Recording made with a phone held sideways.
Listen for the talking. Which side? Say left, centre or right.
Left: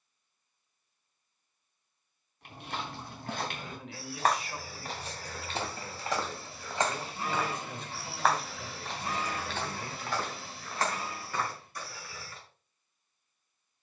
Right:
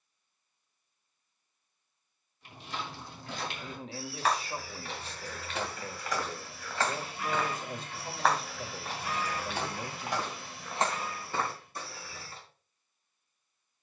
right.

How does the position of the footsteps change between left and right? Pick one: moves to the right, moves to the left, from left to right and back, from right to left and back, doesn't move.
moves to the right.